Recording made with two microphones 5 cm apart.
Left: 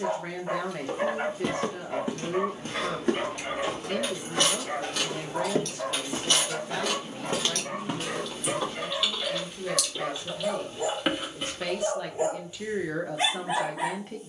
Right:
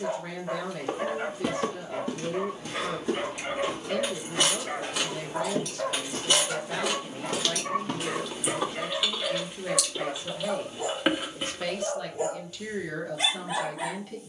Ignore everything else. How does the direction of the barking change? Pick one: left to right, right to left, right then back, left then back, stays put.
right then back.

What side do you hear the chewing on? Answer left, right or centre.
centre.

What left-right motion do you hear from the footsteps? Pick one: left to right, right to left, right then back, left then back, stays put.
left then back.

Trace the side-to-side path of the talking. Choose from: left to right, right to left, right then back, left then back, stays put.
right then back.